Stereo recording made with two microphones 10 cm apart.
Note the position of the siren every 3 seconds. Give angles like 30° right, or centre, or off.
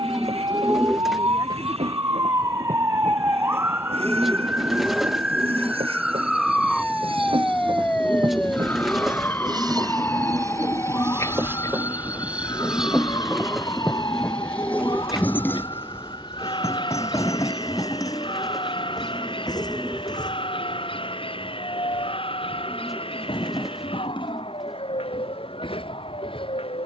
30° right, 10° right, 10° left, 30° left, 40° left, 50° left, 50° left, 60° left, 60° left.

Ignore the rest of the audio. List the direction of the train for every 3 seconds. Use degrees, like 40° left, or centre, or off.
80° right, 70° right, 50° right, 30° right, centre, 30° left, 40° left, 50° left, 50° left.